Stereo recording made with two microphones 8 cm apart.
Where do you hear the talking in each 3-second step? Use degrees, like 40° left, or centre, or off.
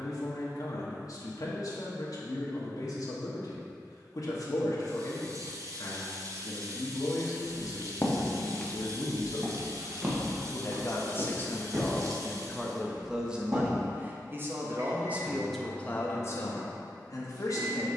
60° left, 60° left, 60° left, 40° left, 10° right, 30° left.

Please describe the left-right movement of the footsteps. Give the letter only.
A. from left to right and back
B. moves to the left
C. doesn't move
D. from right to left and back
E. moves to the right
E.